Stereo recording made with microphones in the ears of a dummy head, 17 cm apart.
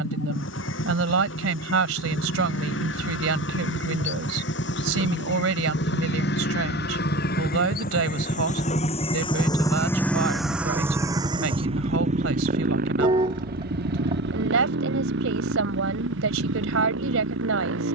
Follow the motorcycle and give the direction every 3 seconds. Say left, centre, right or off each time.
left, left, left, centre, right, right.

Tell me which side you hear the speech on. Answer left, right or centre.
right.